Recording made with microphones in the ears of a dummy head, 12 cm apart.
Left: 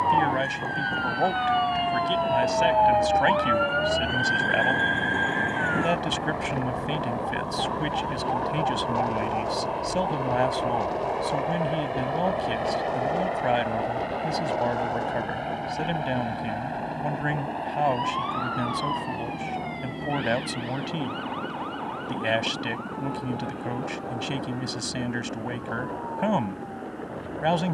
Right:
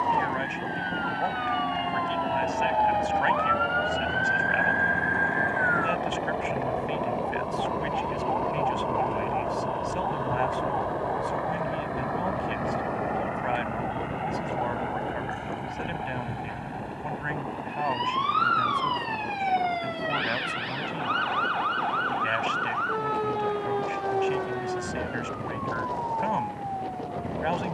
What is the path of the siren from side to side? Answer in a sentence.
You can hear the siren move from left to right.